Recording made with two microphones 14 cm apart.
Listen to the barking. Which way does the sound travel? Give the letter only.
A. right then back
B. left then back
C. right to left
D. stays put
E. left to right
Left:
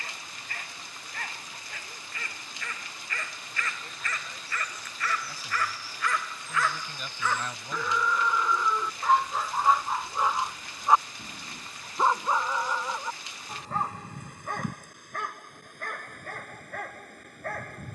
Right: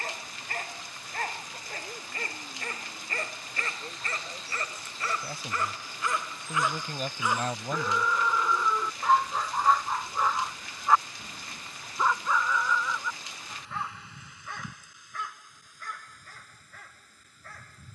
C.